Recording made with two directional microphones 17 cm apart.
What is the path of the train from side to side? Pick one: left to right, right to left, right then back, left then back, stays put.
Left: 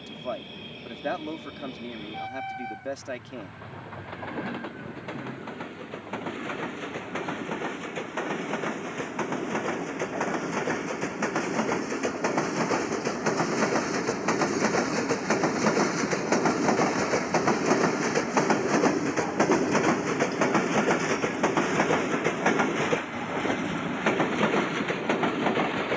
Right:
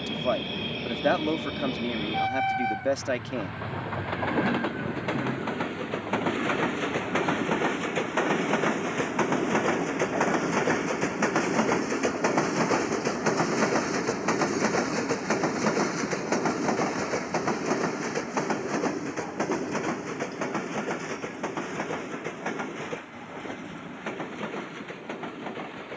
right to left.